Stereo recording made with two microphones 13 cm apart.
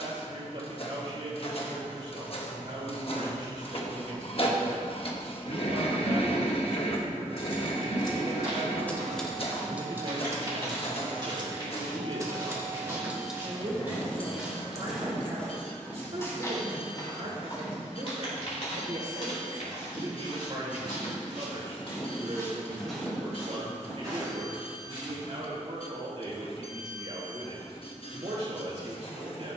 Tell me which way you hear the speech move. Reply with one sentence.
You can hear the speech stay put.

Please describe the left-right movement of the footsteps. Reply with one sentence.
In this clip you hear the footsteps go left and come back.